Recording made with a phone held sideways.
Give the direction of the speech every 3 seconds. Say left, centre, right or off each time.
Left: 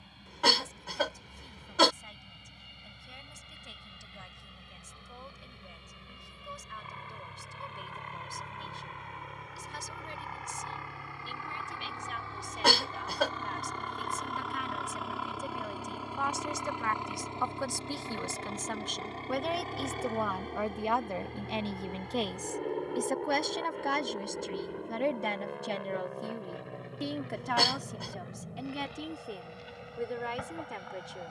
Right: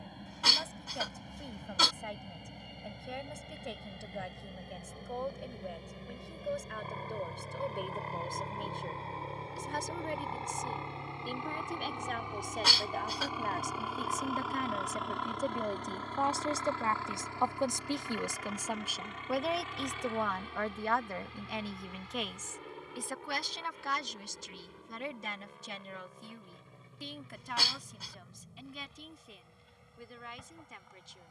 right, right, right, right, right, right, centre, left, left, left, left.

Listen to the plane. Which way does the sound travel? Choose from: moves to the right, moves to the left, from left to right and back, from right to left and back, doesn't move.
moves to the left.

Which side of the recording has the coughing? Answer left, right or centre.
left.